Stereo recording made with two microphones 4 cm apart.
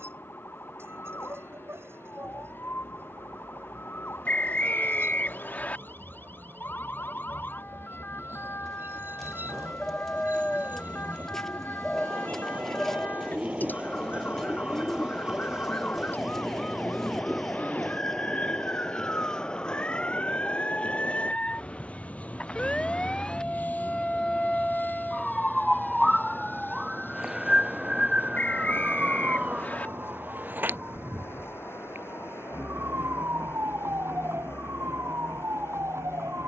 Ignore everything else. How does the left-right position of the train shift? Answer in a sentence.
In this clip you hear the train go from the right side to the left.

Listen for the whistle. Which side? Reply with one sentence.
In this clip you hear the whistle on the left.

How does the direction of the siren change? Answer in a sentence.
In this clip you hear the siren move to the right.